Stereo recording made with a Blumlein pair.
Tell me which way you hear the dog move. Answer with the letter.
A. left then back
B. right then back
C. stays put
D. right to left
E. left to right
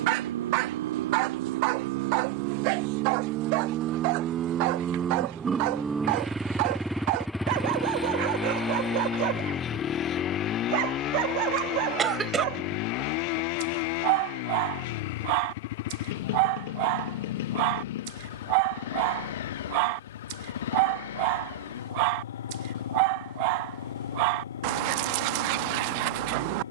C.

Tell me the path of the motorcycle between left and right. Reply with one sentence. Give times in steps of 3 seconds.
In this clip you hear the motorcycle on the right from 0 s, in the centre from 6 s and on the left from 9 s.